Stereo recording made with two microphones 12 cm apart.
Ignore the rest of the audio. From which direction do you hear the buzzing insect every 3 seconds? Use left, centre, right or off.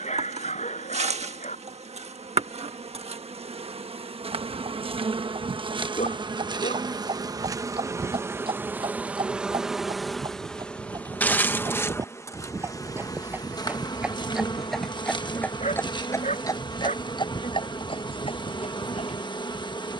right, right, right, centre, left, left, left.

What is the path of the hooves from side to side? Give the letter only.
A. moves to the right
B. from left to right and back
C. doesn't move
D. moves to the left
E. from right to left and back
D.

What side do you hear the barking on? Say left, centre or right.
left.